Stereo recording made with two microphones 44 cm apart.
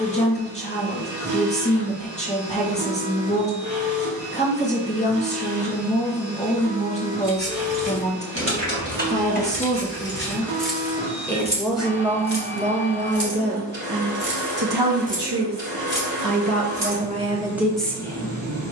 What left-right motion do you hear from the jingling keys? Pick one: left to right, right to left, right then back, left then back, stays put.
left to right.